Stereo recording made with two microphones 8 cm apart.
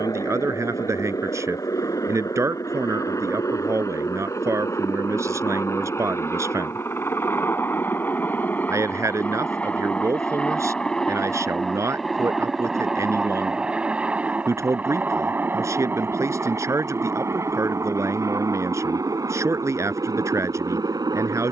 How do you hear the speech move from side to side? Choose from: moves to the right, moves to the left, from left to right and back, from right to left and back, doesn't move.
doesn't move.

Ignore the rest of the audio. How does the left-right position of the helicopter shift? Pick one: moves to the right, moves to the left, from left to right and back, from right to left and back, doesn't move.
moves to the right.